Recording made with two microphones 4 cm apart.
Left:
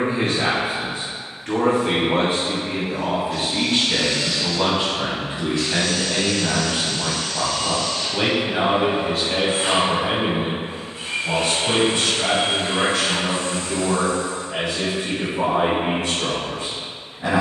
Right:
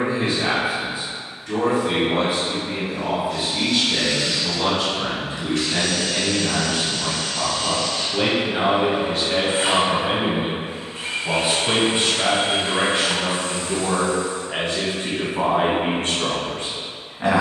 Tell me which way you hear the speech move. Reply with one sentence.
You can hear the speech travel towards the right.